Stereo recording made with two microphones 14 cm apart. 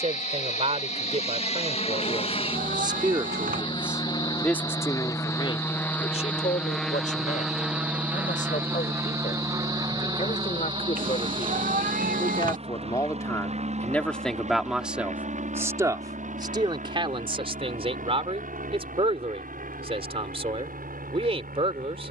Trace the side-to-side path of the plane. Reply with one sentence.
In this clip you hear the plane go from the left side to the right.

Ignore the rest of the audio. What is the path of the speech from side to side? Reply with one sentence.
In this clip you hear the speech go left and come back.